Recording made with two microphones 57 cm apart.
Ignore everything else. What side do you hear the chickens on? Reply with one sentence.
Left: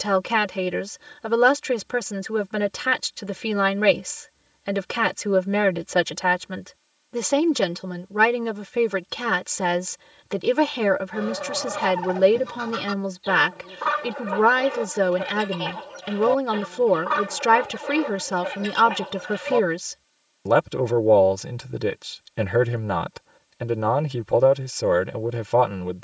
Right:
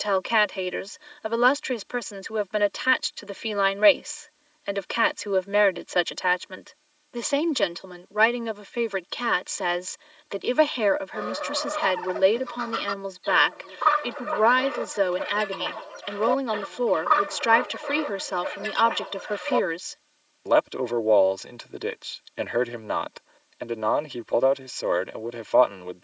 You can hear the chickens on the left.